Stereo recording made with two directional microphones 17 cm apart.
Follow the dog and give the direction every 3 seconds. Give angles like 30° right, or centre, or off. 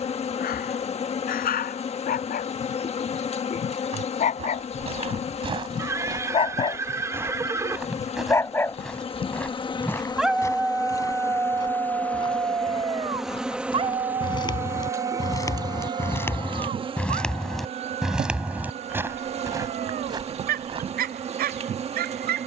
60° left, 40° left, 20° left, 10° right, 30° right, 50° right, 60° right, 60° right.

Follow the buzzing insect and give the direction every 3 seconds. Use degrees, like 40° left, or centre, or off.
40° left, 40° left, 40° left, 20° left, centre, 30° right, 40° right, 40° right.